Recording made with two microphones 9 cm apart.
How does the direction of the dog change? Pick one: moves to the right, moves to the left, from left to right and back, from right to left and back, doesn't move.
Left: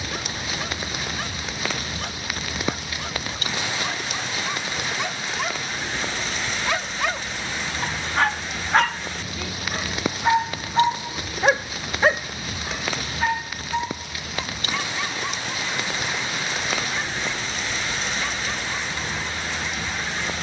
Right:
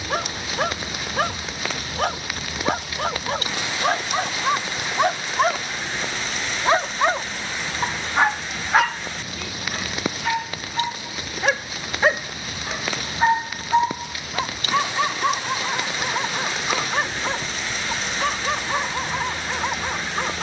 from right to left and back.